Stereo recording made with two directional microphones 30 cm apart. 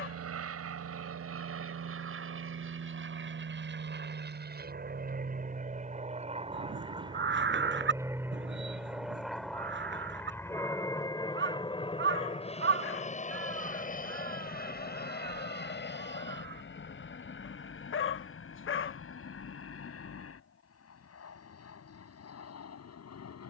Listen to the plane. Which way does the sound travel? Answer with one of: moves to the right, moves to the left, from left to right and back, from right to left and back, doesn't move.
moves to the left.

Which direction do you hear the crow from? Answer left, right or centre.
right.